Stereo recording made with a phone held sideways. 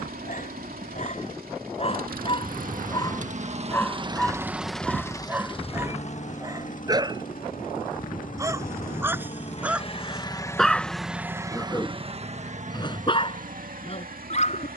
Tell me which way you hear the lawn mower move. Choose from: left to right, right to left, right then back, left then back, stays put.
left then back.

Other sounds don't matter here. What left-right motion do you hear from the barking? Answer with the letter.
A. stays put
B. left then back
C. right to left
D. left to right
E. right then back
E.